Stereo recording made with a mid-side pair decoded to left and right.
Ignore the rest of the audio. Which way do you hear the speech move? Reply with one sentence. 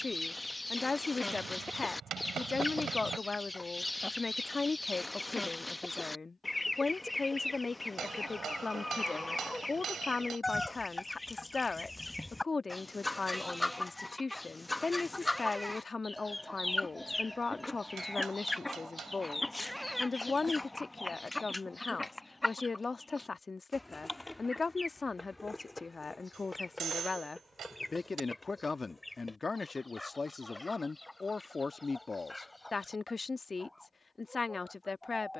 You can hear the speech stay put.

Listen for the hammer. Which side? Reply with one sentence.
You can hear the hammer on the right.